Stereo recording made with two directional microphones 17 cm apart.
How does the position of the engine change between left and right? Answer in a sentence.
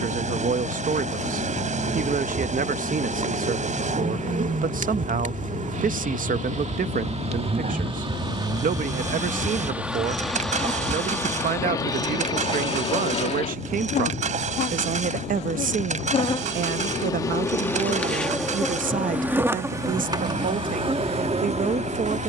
You can hear the engine stay put.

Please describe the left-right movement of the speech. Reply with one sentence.
You can hear the speech stay in one place.